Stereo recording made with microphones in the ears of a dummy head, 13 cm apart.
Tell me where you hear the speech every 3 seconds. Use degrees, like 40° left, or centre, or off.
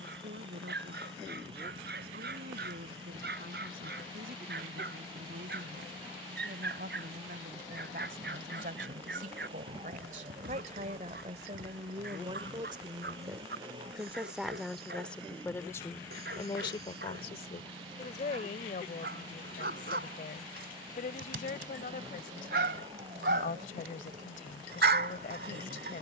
70° right, 70° right, 60° right, 50° right, 20° right, 30° left, 50° left, 60° left, 60° left.